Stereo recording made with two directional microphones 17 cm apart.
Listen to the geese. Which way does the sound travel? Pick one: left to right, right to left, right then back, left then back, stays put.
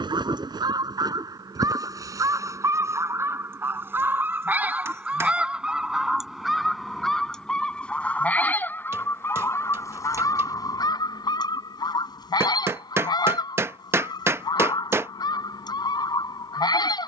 right to left.